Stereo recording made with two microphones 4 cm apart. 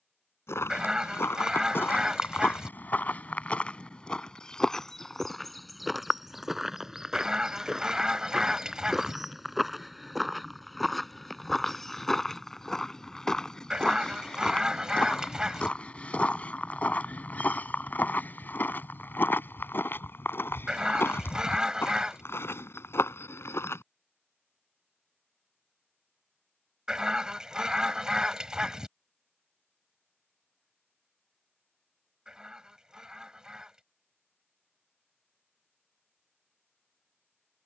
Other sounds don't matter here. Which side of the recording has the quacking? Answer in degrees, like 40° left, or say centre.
20° right.